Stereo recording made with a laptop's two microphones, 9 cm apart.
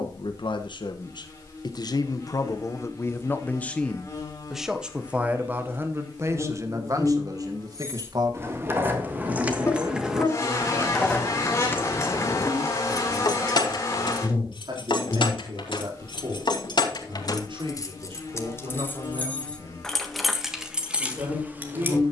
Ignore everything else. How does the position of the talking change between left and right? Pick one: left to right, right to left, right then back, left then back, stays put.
left to right.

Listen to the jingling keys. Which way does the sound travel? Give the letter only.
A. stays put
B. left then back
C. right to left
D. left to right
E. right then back
B.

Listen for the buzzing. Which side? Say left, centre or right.
left.